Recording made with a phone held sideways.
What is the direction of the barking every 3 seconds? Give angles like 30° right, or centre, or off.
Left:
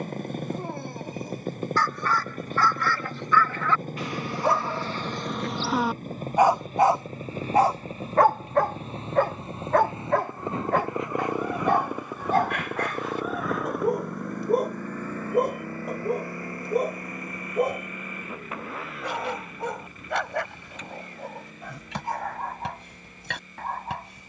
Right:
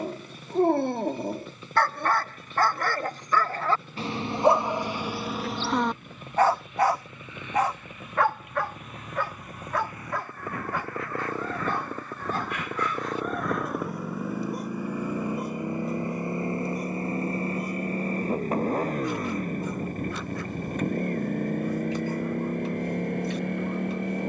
50° right, 20° right, 30° left, 60° left, 60° left, 70° left, 70° left, 80° left.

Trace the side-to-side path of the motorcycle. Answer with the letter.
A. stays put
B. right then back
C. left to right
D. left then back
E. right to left
C.